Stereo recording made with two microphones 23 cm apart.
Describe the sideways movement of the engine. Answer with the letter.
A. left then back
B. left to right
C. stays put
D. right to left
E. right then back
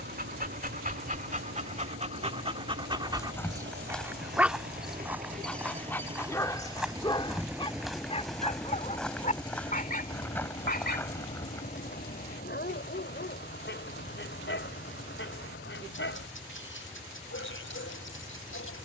D.